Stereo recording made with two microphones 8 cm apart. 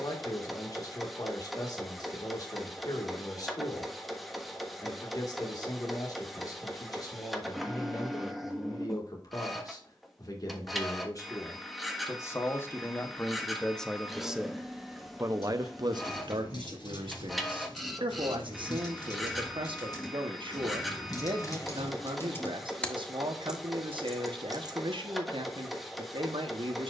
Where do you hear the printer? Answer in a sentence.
In this clip you hear the printer in the centre.